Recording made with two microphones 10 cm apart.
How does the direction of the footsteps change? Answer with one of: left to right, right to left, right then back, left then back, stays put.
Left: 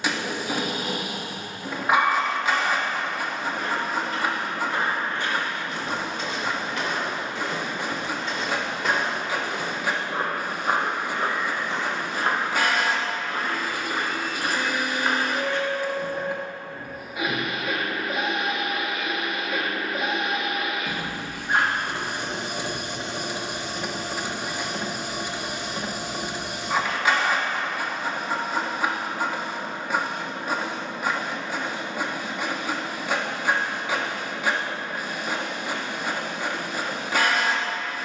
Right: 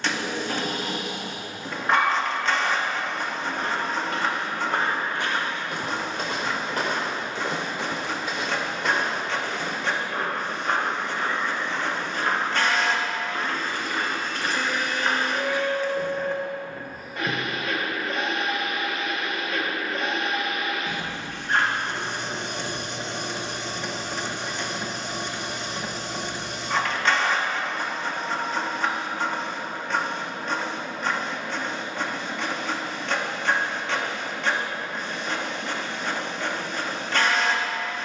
left then back.